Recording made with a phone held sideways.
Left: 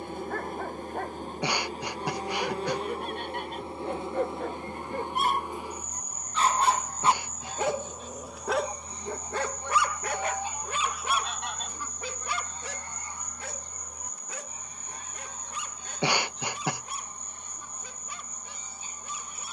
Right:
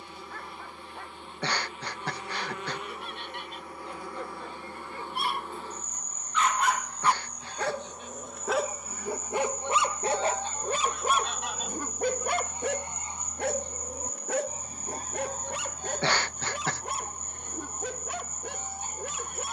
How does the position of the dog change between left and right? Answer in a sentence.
In this clip you hear the dog go from the left side to the right.